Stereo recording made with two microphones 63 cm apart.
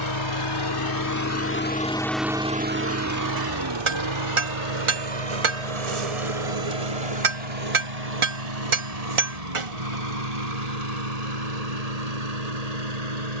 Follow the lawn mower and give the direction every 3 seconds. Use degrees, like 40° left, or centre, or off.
20° left, 50° right, 70° right, 80° right, 80° right.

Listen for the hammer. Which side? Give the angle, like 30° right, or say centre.
50° right.